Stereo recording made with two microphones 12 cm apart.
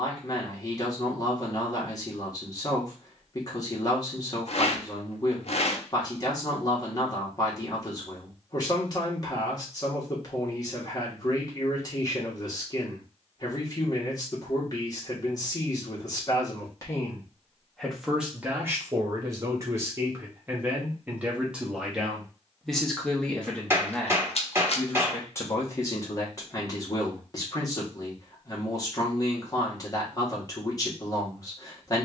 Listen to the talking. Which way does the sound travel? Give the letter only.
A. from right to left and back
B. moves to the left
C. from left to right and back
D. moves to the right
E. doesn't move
C.